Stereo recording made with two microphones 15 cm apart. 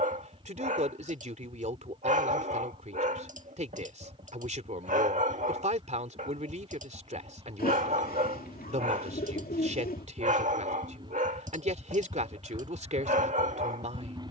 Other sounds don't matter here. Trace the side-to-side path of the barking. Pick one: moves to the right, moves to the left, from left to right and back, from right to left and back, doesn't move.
doesn't move.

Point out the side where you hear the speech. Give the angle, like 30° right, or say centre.
50° right.